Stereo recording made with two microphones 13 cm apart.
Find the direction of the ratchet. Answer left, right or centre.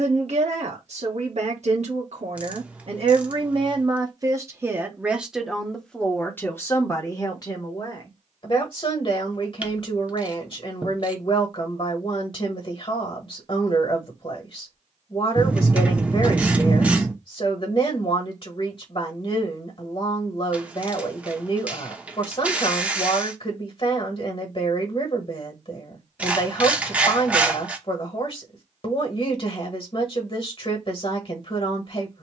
centre.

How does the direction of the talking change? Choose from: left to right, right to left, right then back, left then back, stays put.
right to left.